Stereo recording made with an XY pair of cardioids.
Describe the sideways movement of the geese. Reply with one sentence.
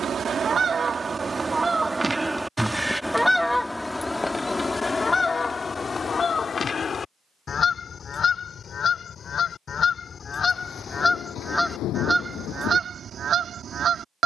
In this clip you hear the geese move from right to left and back again.